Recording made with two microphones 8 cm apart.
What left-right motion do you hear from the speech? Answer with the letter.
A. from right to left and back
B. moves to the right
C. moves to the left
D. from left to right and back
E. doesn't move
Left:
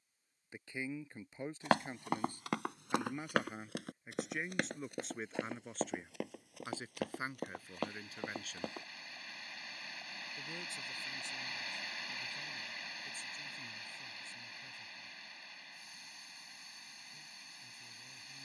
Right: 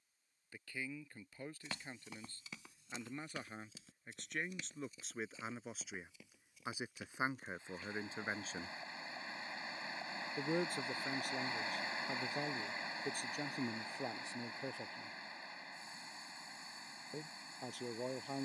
B.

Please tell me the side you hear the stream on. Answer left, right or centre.
right.